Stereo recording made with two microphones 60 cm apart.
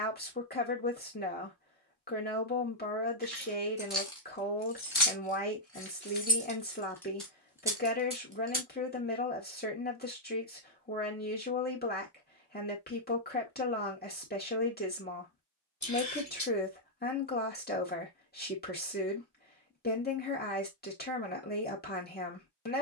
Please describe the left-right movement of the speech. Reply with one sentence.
You can hear the speech stay in one place.